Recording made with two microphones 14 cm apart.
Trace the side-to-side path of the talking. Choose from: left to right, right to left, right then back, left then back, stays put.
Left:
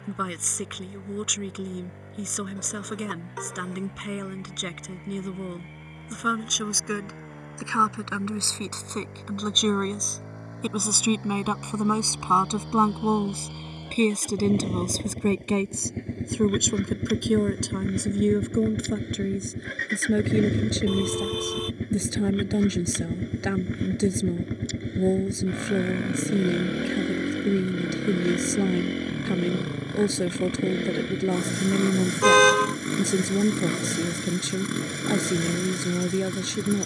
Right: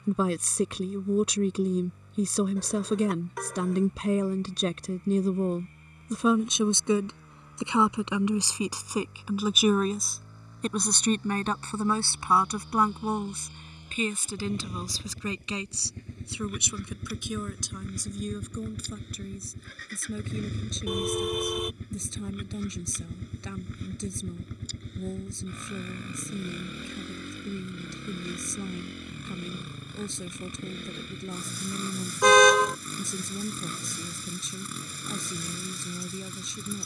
right to left.